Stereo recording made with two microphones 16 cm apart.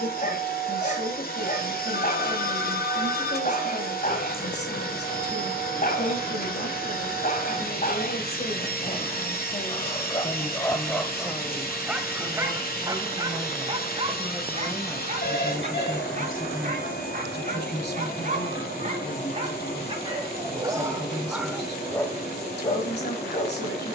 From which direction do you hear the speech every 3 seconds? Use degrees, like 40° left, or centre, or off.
70° left, 70° left, 70° left, 20° left, centre, 50° left, 70° left, 70° left.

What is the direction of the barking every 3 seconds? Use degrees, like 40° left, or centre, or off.
50° left, 50° left, 50° left, 20° left, 30° right, 50° right, 40° right, 10° left.